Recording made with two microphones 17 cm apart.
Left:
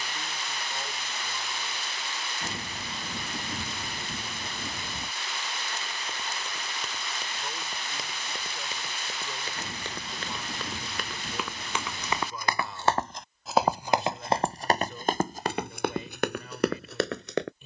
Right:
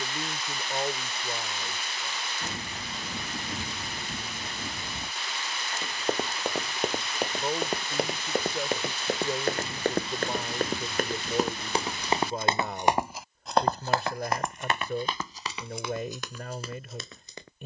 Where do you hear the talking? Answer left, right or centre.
right.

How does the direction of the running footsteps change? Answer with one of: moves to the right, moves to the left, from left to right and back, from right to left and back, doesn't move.
moves to the left.